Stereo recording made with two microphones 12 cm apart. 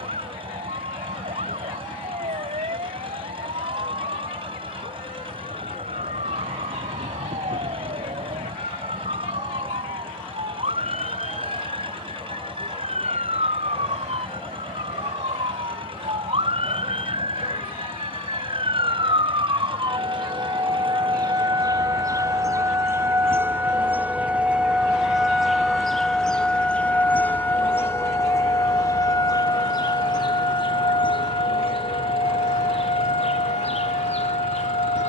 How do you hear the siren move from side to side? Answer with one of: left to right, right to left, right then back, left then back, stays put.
right to left.